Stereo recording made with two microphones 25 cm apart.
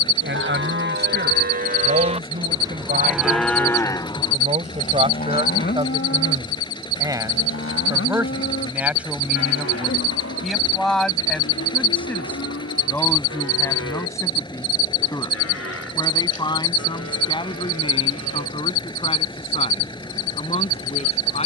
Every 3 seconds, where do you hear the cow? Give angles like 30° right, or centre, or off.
30° right, 20° left, 50° left, 70° left, 70° left, 70° left, 80° left.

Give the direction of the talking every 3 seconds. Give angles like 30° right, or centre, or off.
40° right, 30° right, 10° right, centre, 10° left, 20° left, 20° left.